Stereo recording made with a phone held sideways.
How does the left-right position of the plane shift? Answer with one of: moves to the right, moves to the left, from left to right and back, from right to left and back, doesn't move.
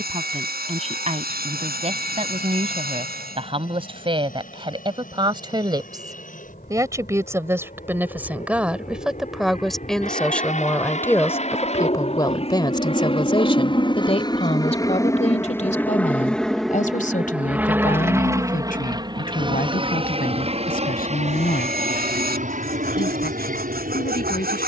moves to the right.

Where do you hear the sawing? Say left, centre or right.
right.